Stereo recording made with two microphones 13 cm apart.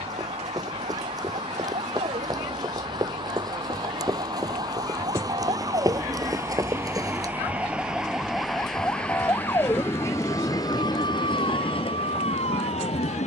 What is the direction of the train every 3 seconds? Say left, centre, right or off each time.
right, right, centre, left, left.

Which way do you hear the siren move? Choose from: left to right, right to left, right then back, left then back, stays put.
right to left.